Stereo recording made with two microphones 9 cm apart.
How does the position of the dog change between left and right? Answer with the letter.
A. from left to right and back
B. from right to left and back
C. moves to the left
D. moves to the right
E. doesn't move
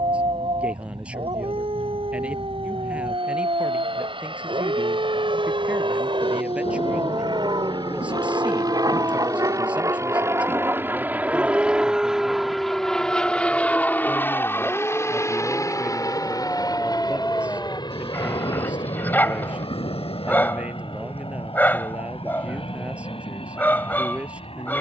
C.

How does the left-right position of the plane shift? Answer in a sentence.
In this clip you hear the plane move to the left.